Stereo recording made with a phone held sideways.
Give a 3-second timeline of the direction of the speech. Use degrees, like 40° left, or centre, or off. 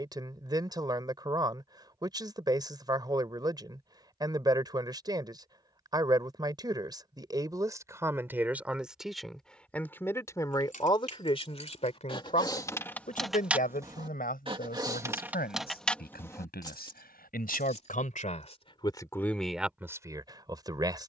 20° right, 20° right, 20° right, 20° left, 60° left, 70° left, centre.